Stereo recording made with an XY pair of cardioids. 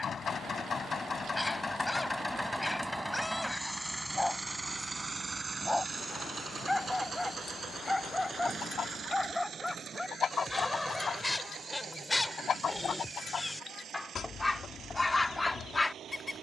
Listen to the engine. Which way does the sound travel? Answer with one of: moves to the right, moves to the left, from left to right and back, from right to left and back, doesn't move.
moves to the right.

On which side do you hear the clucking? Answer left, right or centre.
left.